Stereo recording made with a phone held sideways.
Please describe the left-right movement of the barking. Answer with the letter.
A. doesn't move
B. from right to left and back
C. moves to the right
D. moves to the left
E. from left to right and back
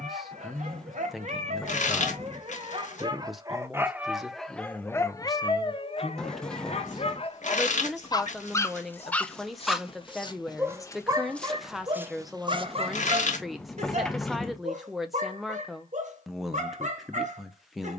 B.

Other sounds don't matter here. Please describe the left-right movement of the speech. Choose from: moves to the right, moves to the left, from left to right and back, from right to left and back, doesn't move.
doesn't move.